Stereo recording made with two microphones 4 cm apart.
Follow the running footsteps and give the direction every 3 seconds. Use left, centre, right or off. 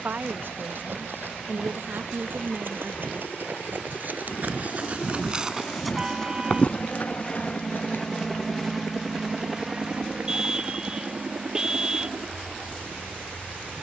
right, right, left, off, off.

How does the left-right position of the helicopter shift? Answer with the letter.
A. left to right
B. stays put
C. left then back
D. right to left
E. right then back
A.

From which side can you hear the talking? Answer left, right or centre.
right.